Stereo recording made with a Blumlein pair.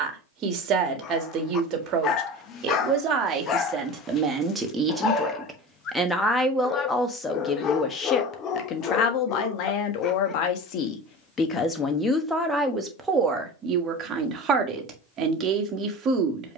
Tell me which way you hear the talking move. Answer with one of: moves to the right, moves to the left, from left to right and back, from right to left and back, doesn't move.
from right to left and back.